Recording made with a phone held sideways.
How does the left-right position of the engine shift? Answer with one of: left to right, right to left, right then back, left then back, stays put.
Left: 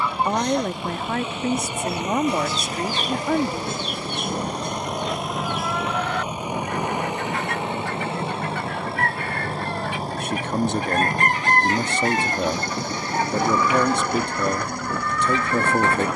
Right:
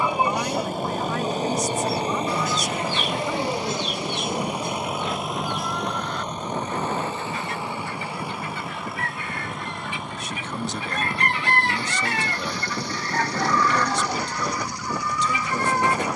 right to left.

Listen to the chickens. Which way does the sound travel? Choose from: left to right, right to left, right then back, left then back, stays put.
left then back.